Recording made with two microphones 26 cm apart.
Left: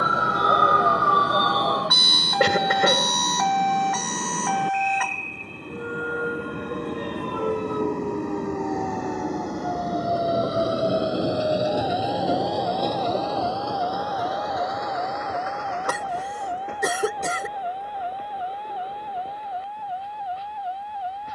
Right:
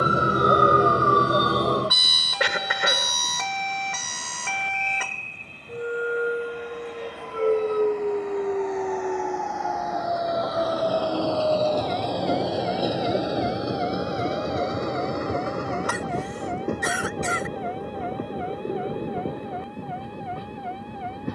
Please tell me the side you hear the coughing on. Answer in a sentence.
You can hear the coughing on the left.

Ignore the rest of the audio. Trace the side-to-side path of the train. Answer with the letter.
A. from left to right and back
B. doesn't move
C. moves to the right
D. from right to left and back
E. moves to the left
C.